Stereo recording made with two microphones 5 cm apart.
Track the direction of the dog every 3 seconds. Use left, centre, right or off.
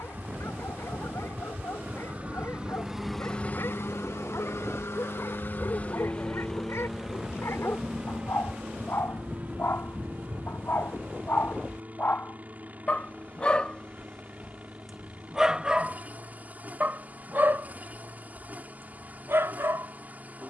left, left, left, left, left, right, right.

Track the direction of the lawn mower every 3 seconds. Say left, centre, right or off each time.
right, left, centre, right, right, right, right.